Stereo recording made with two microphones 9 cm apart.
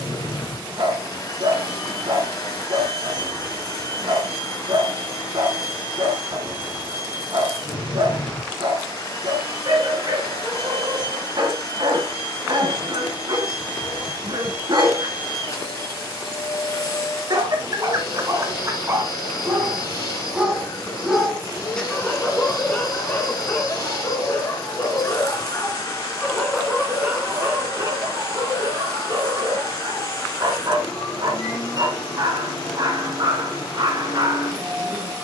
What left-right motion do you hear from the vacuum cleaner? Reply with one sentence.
In this clip you hear the vacuum cleaner stay in one place.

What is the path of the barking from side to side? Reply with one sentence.
In this clip you hear the barking move from right to left and back again.